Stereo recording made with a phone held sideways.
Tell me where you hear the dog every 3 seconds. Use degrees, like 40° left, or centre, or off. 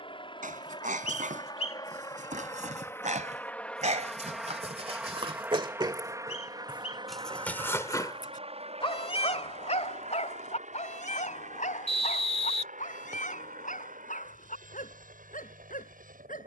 70° right, 50° right, 10° left, 60° left, 70° left, 80° left.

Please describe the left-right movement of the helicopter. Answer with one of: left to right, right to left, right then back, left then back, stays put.
left to right.